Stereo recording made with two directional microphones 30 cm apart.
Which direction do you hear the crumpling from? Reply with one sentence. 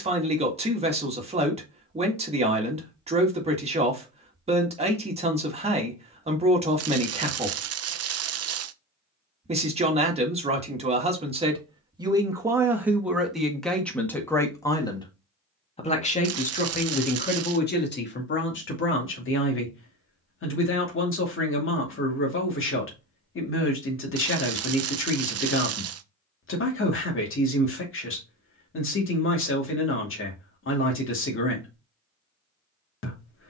You can hear the crumpling on the right.